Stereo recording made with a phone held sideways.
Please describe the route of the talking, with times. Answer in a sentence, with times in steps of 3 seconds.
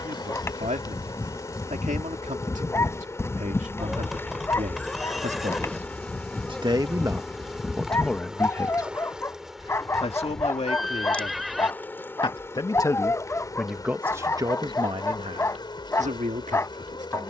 You can hear the talking on the right from 0 s, in the centre from 6 s, on the left from 9 s, in the centre from 12 s and on the right from 15 s.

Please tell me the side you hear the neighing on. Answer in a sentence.
In this clip you hear the neighing in the centre.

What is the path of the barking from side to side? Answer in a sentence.
You can hear the barking stay in one place.